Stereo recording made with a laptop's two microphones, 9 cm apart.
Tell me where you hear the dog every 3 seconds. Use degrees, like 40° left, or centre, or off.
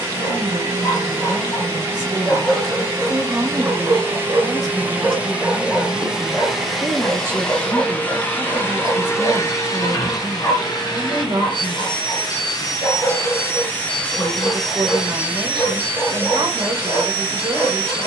20° left, 20° right, 20° left, 40° left, 40° left, 40° left.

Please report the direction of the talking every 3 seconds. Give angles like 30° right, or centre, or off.
50° right, centre, 30° right, 50° right, 50° right, 50° right.